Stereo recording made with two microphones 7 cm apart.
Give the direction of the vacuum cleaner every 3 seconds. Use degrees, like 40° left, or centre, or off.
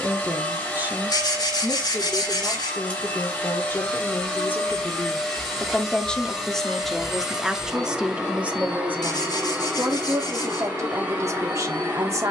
20° left, 10° left, 10° right, 20° right.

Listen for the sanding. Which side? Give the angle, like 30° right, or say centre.
70° left.